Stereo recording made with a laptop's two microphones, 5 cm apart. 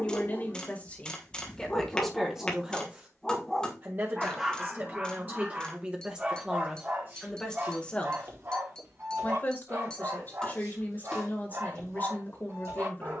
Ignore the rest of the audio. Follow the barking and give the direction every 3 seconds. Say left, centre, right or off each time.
left, centre, right, right, right.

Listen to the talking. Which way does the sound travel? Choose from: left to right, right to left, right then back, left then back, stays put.
right then back.